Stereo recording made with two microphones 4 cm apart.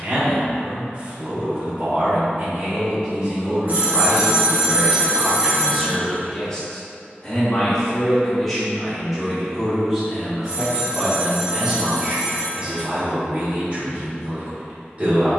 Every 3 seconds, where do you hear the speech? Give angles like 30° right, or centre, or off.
30° right, 20° right, 10° left, 20° right, 30° right.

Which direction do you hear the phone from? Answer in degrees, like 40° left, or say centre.
40° right.